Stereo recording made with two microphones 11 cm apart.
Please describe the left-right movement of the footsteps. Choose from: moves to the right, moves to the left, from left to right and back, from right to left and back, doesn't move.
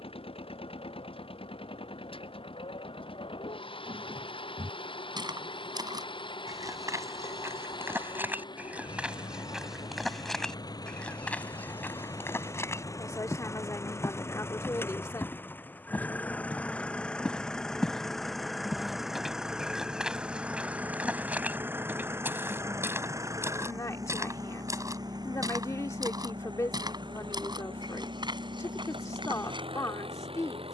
from right to left and back.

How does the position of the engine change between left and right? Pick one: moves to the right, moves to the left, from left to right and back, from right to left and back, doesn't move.
moves to the right.